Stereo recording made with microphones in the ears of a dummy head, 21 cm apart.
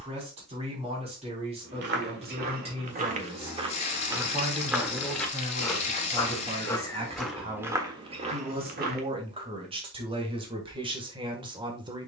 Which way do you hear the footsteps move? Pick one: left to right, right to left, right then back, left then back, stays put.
left then back.